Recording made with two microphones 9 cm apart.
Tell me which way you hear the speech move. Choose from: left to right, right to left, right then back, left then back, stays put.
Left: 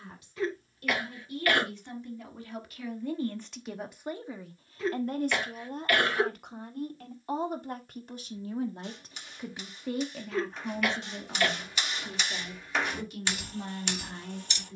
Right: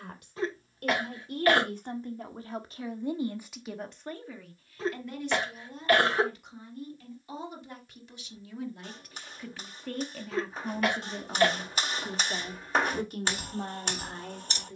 left then back.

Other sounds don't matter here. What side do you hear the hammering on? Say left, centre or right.
right.